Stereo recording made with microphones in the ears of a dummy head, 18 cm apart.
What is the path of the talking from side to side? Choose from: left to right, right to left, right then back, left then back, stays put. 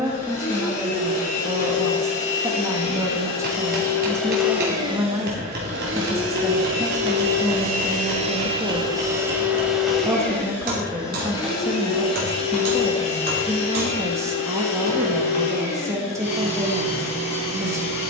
stays put.